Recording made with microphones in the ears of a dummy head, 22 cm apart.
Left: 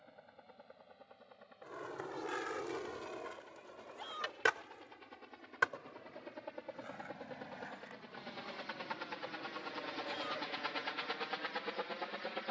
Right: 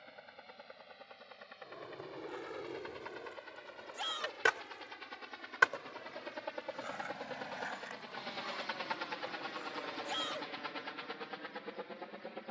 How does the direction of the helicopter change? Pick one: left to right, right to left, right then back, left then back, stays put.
right to left.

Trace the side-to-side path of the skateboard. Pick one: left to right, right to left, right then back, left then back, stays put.
left to right.